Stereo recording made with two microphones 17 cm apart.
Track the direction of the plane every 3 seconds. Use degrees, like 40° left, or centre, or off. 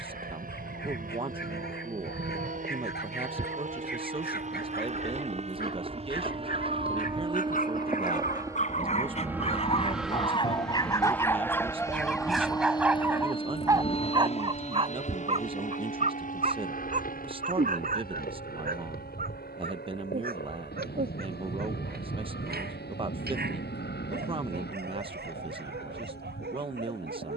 60° right, 50° right, 30° right, centre, 30° left, 50° left, 60° left, 70° left, 70° left.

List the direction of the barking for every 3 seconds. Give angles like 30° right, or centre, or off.
70° left, 70° left, 50° left, 30° left, 10° right, 50° right, 60° right, 70° right, 70° right.